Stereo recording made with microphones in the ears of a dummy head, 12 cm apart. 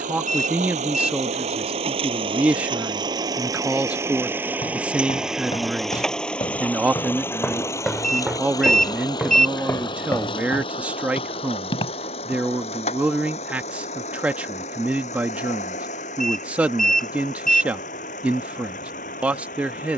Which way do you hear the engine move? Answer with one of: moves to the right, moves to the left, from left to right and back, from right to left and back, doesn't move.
moves to the left.